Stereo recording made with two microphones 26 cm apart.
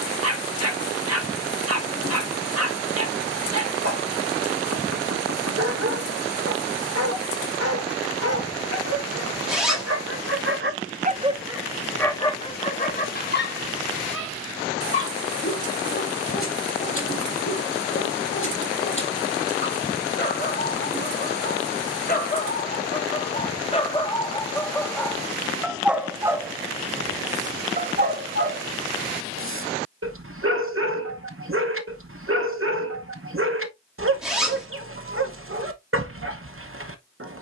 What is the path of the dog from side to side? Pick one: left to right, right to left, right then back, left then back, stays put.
left then back.